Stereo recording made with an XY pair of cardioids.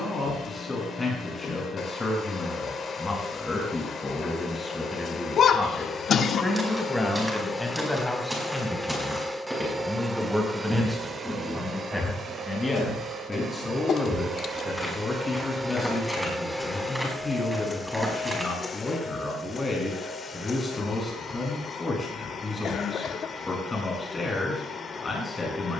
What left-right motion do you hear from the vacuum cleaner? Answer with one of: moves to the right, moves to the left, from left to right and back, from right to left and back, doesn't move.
from left to right and back.